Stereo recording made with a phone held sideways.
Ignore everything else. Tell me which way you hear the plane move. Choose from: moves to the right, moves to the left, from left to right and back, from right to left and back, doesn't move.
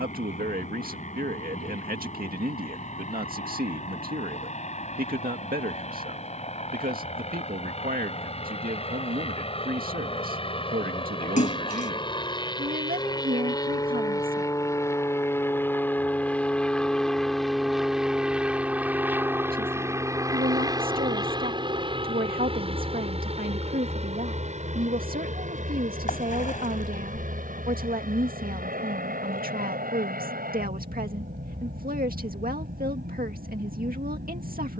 moves to the right.